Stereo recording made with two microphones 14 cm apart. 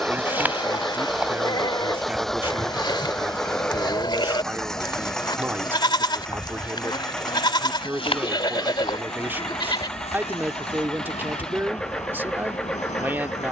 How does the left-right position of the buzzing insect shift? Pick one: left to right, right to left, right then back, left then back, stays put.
right to left.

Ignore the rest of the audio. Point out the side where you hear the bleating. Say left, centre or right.
left.